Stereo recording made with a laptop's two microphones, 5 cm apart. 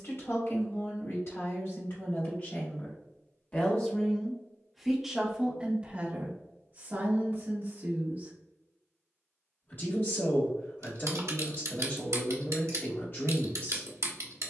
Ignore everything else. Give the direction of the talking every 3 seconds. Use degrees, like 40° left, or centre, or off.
60° left, centre, 40° right, 50° left, 50° left.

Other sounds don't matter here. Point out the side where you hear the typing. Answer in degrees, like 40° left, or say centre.
80° right.